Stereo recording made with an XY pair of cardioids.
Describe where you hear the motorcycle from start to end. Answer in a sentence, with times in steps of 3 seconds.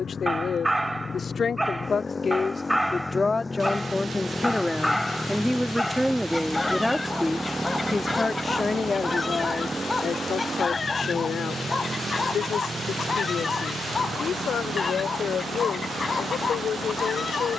In this clip you hear the motorcycle on the left from 0 s, in the centre from 3 s and on the right from 9 s.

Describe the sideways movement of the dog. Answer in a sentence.
In this clip you hear the dog travel towards the left.